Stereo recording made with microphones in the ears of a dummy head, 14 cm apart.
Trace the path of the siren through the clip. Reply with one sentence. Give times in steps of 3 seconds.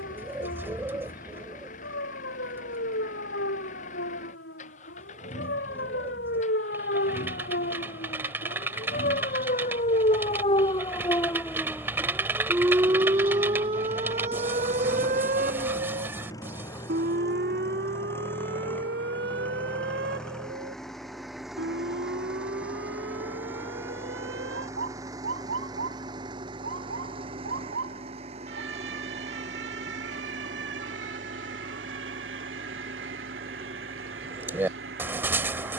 You can hear the siren on the left from 0 s and on the right from 12 s.